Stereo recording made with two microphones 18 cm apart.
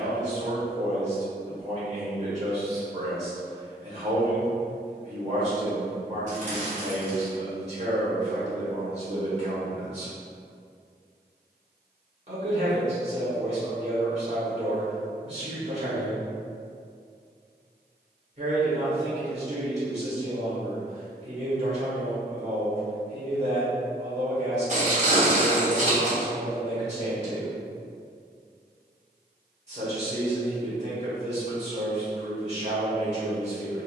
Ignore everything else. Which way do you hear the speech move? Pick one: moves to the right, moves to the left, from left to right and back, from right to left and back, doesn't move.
doesn't move.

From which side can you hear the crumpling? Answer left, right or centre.
right.